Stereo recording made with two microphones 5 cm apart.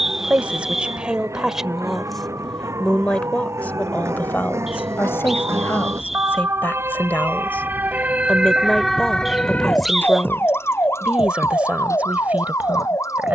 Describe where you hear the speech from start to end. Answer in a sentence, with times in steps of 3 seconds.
You can hear the speech in the centre from 0 s, on the left from 3 s, in the centre from 9 s and on the right from 12 s.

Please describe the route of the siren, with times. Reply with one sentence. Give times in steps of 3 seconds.
In this clip you hear the siren on the right from 0 s and on the left from 9 s.